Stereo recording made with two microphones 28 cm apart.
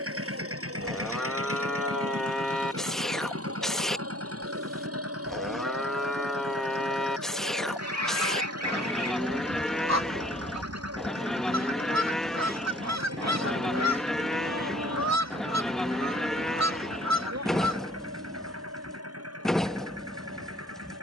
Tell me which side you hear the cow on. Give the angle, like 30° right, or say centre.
centre.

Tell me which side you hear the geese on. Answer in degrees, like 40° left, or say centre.
70° right.